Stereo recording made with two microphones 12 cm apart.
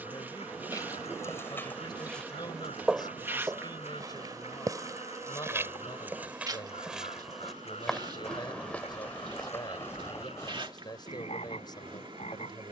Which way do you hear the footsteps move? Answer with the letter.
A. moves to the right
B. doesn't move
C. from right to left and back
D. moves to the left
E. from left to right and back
E.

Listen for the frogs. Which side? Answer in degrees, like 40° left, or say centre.
60° left.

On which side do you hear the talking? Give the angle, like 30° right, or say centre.
40° left.